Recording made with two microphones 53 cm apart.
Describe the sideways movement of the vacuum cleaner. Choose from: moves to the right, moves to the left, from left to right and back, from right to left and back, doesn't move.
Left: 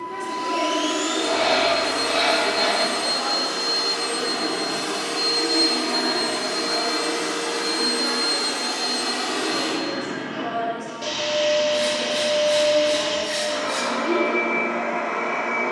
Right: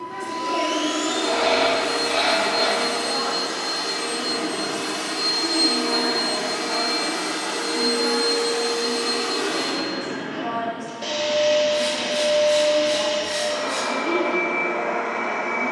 moves to the left.